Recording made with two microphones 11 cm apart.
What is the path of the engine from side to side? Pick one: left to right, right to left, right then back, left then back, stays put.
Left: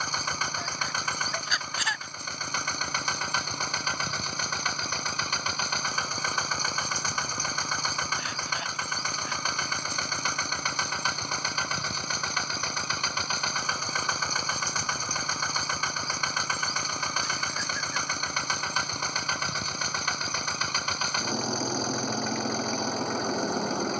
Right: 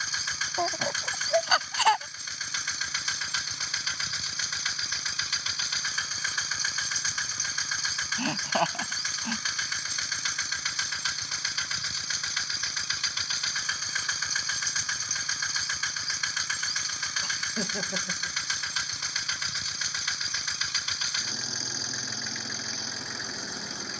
stays put.